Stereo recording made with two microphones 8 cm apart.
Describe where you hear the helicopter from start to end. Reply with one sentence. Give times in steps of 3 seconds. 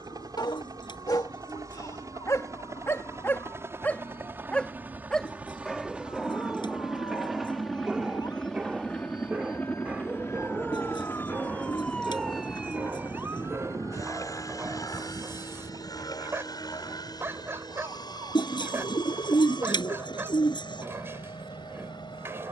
You can hear the helicopter on the right from 0 s, in the centre from 6 s and on the left from 9 s.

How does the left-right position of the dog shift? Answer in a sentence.
In this clip you hear the dog travel towards the right.